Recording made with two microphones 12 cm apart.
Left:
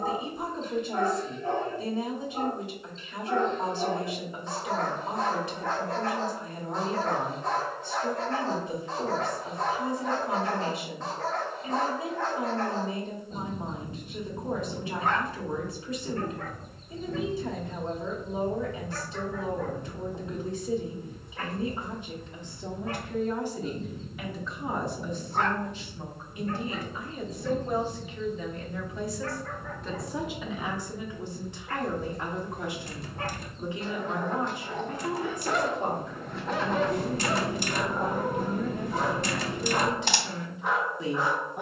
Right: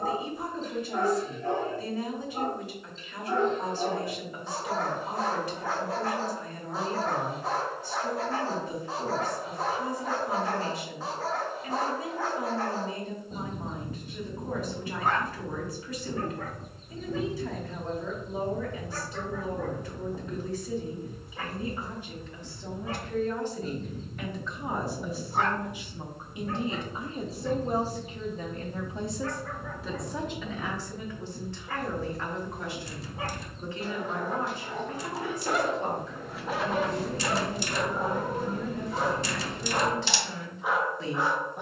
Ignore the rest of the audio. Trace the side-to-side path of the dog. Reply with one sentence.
In this clip you hear the dog stay in one place.